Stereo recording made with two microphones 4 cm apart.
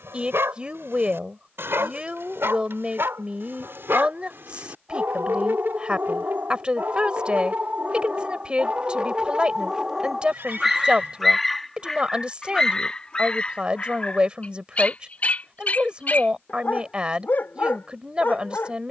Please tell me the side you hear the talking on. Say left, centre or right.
right.